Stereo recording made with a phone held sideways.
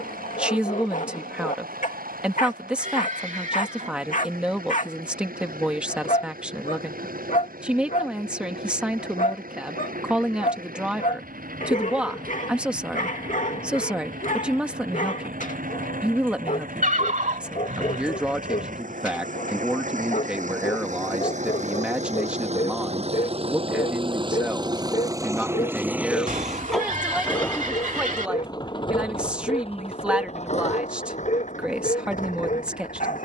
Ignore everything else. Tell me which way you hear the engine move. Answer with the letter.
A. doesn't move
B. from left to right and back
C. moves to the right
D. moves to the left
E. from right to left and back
D.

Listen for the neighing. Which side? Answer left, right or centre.
right.